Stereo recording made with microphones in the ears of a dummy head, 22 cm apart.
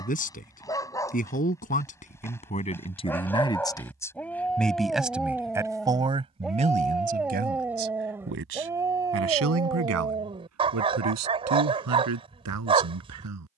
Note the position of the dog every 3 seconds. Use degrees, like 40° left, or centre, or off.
10° left, centre, 10° right, 20° right, 20° right.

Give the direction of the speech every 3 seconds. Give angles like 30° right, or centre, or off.
30° left, 10° left, 40° right, 70° right, 80° right.